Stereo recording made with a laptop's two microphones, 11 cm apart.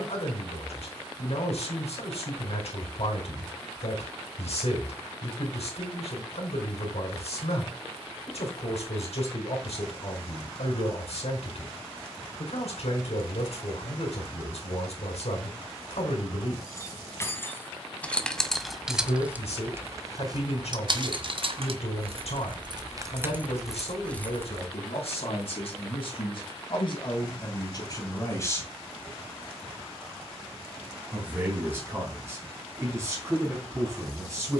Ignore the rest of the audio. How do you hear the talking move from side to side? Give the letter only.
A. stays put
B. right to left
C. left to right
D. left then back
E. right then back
C.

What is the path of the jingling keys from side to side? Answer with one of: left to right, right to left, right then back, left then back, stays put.
right then back.